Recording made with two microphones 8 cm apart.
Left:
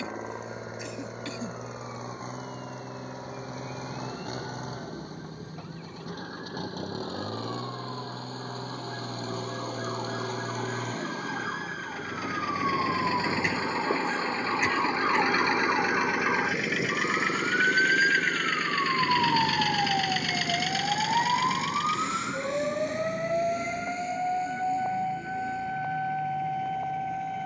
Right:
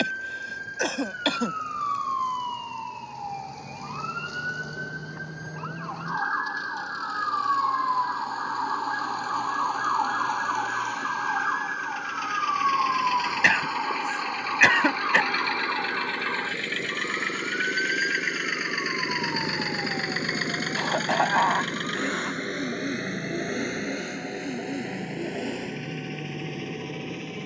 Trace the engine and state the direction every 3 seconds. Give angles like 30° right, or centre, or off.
50° left, 50° left, 50° left, 40° left, 30° left, 10° left, 20° right, 50° right, 70° right.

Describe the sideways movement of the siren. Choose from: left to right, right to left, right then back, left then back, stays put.
right to left.